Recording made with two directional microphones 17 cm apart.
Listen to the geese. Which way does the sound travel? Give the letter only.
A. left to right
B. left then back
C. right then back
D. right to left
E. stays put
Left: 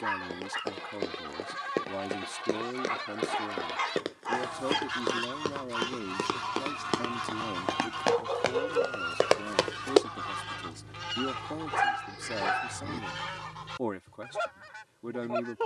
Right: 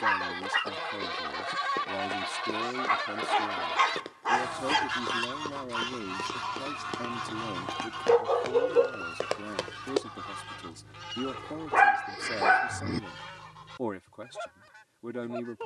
D.